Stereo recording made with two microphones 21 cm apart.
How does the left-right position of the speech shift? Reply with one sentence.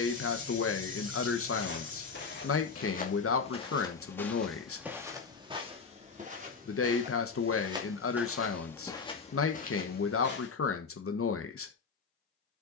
In this clip you hear the speech stay in one place.